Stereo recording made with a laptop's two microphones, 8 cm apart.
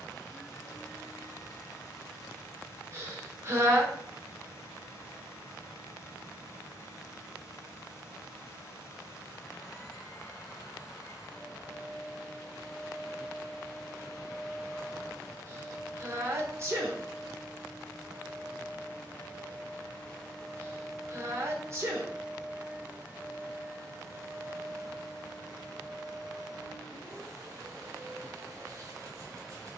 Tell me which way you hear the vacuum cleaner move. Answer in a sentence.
You can hear the vacuum cleaner move from left to right.